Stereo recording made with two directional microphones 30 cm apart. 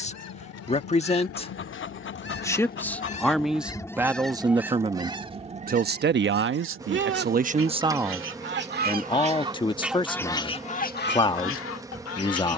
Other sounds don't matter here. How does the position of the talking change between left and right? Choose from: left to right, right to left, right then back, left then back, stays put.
right then back.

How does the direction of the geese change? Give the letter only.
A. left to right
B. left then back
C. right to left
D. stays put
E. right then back
E.